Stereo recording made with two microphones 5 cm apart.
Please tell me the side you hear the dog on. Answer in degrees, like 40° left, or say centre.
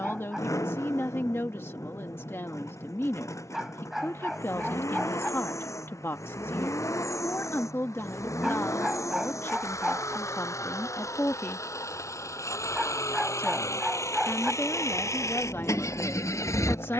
10° right.